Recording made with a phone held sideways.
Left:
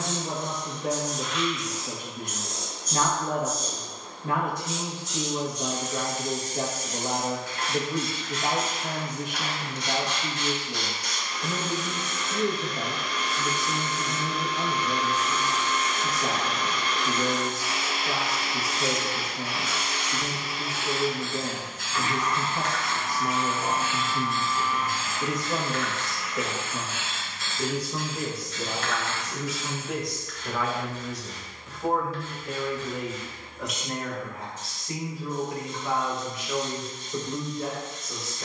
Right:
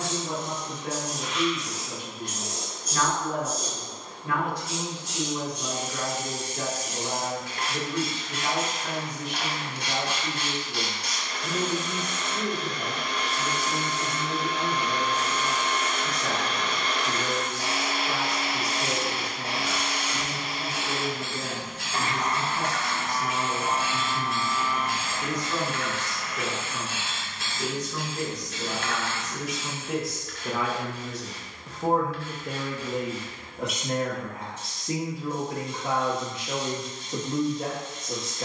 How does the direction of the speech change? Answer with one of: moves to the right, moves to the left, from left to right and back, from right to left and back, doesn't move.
moves to the right.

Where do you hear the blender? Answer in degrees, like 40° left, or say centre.
70° right.